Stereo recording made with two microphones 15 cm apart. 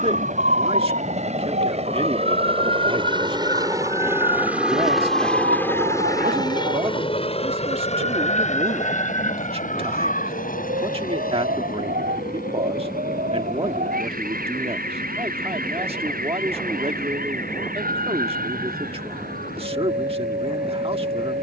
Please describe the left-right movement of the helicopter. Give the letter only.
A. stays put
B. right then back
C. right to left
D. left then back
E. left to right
C.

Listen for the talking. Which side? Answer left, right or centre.
right.